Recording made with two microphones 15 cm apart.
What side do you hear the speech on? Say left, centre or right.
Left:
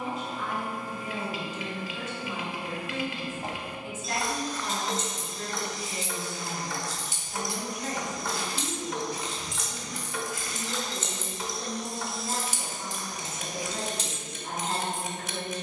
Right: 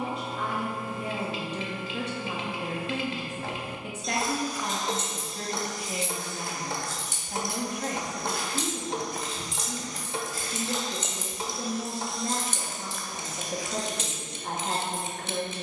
right.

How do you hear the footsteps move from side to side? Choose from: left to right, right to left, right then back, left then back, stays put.
right then back.